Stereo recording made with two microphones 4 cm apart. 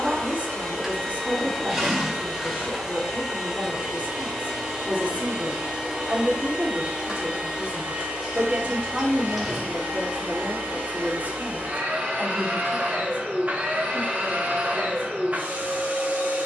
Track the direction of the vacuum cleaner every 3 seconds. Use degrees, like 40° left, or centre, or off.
10° left, 10° right, 20° right, 30° right, 40° right, 40° right.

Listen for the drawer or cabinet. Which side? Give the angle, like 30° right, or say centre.
10° right.